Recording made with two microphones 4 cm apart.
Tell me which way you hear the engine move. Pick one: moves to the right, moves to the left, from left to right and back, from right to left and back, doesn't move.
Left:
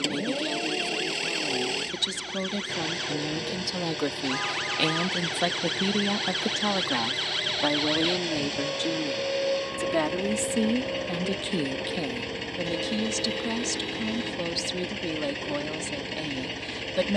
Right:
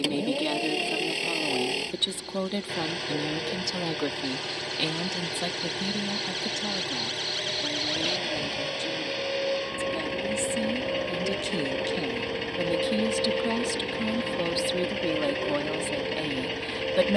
doesn't move.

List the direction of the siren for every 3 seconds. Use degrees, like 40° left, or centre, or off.
70° left, 60° left, 30° left, centre, 30° right, 50° right.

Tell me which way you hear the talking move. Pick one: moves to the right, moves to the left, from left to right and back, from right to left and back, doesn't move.
from right to left and back.